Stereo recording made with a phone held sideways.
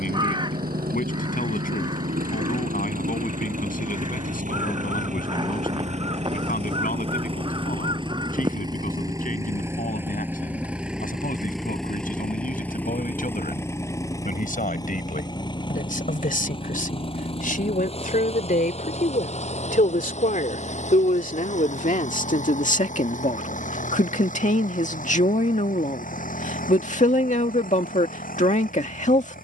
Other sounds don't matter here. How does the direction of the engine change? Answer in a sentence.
In this clip you hear the engine travel towards the left.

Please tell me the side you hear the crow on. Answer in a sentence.
In this clip you hear the crow on the right.